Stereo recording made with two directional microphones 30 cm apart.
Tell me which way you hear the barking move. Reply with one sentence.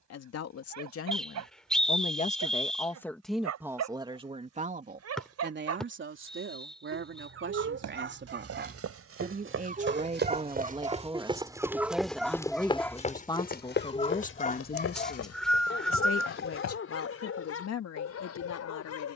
You can hear the barking travel towards the left.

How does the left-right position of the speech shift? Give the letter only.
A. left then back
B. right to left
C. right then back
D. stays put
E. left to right
C.